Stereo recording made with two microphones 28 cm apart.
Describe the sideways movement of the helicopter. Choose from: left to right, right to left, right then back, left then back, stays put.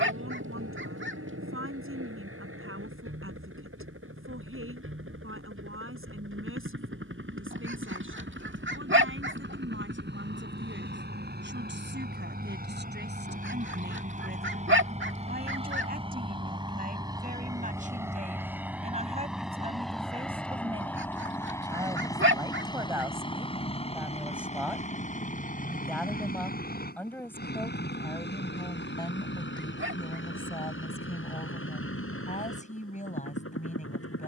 right to left.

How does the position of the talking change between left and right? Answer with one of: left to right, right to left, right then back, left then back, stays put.
right to left.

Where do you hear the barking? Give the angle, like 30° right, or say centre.
50° right.